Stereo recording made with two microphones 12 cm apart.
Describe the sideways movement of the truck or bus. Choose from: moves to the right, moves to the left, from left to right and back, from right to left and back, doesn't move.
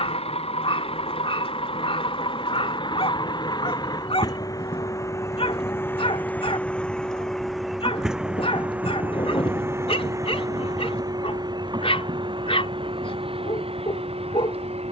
moves to the right.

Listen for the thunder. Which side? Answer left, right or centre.
left.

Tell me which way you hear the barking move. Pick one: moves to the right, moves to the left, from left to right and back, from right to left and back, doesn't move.
doesn't move.